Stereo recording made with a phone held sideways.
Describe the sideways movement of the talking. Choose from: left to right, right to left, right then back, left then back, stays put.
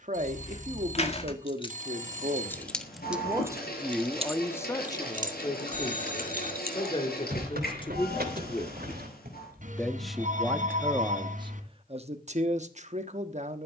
left then back.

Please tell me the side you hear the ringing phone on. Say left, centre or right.
right.